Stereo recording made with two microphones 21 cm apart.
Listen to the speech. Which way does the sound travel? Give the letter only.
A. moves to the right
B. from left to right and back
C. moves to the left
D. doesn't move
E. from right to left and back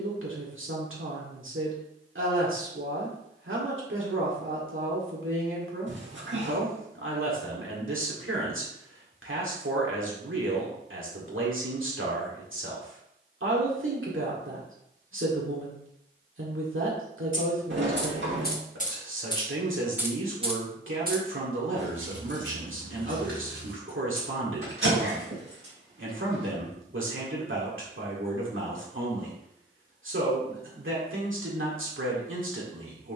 D.